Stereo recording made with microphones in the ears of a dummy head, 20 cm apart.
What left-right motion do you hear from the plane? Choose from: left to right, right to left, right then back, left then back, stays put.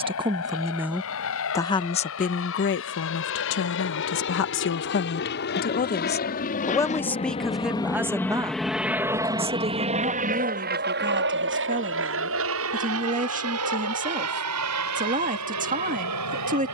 left to right.